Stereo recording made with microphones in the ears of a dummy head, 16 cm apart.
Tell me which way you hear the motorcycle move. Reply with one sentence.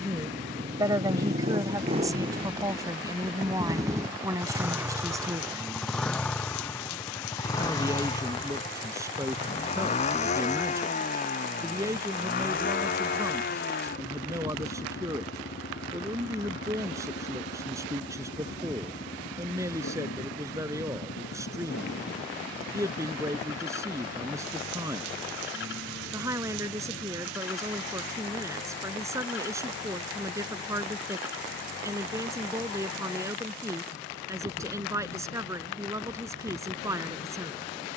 You can hear the motorcycle go from the right side to the left.